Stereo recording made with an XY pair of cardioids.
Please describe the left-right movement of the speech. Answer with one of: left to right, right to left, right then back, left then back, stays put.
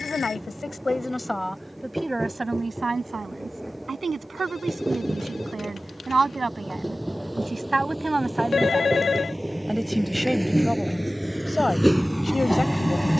right then back.